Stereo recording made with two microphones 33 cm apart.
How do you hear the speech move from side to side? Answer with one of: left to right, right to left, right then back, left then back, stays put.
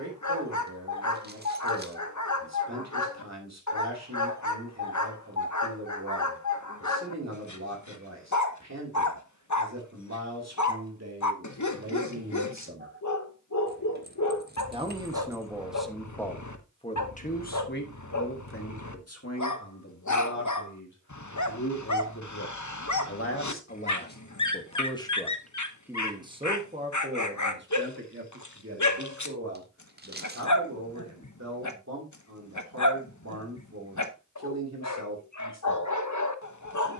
left then back.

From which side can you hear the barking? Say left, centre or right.
left.